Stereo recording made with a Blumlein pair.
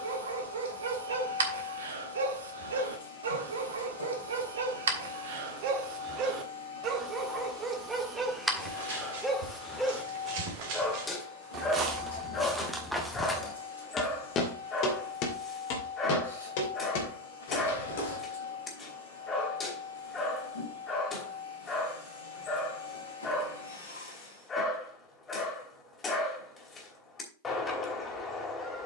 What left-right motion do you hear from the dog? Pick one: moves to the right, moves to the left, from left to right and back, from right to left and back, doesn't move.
moves to the left.